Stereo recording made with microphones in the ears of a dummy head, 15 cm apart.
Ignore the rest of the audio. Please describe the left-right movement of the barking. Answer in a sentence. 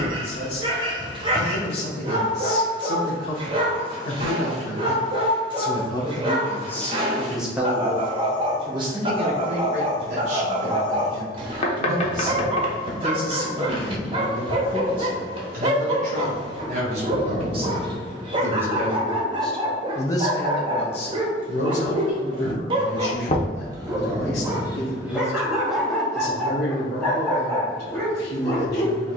You can hear the barking travel towards the left.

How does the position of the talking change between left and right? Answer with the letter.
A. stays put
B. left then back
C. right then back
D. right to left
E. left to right
C.